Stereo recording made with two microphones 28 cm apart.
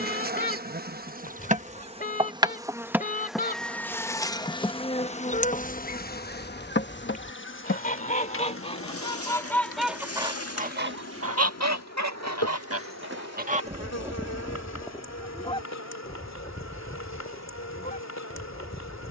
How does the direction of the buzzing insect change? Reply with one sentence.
You can hear the buzzing insect go from the right side to the left.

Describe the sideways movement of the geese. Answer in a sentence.
You can hear the geese go right and come back.